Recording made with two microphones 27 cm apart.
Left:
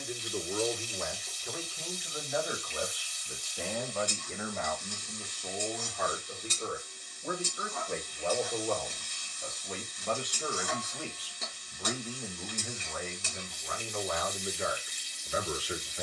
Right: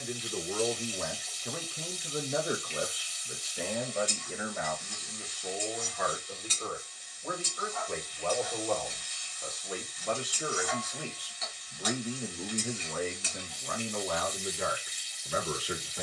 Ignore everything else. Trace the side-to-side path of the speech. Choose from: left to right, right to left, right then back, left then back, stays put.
left then back.